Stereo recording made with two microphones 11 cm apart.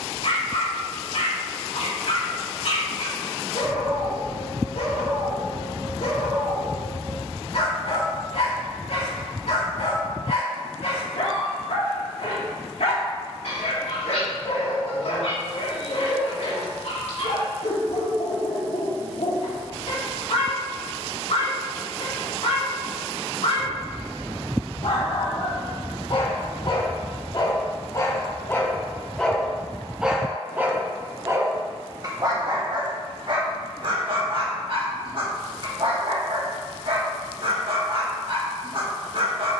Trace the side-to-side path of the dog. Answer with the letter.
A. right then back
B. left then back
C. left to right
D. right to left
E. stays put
C.